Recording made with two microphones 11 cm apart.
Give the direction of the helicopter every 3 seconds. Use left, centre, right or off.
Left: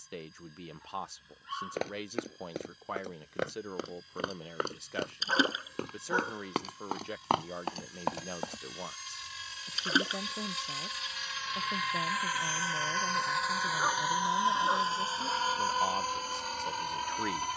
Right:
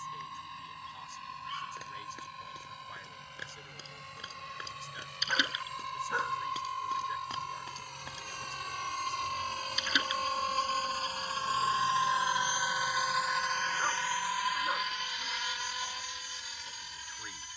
right, right, right, right, centre, left.